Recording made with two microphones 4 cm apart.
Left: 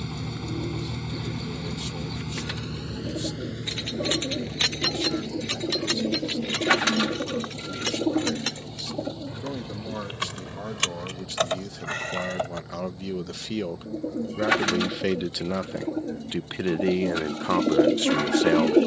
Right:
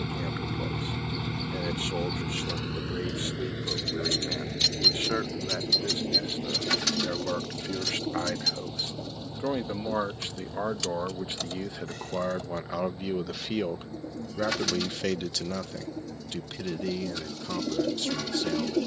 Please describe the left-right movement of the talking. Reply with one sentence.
In this clip you hear the talking move to the left.